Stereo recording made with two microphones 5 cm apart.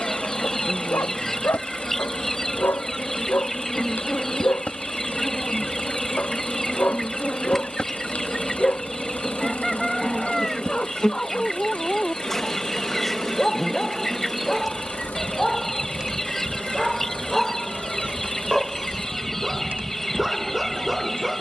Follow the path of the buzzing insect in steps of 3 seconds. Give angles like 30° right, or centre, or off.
30° left, 30° left, 20° left, 10° left, centre, 20° right, 40° right.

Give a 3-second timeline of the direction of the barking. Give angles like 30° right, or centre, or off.
50° left, 40° left, 30° left, 20° left, 10° left, centre, 10° right.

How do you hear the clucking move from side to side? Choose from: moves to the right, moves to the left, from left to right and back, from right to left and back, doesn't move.
doesn't move.